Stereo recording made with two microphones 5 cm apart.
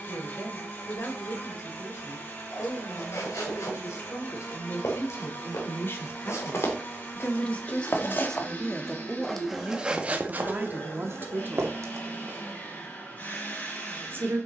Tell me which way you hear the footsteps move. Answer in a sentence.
In this clip you hear the footsteps travel towards the right.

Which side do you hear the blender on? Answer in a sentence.
You can hear the blender on the left.